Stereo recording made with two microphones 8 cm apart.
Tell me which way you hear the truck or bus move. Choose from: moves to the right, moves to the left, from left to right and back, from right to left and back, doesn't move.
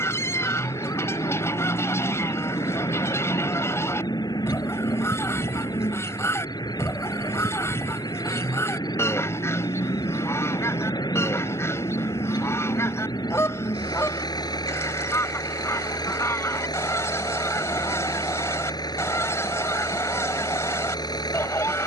doesn't move.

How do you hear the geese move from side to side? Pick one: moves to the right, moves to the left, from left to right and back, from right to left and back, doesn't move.
doesn't move.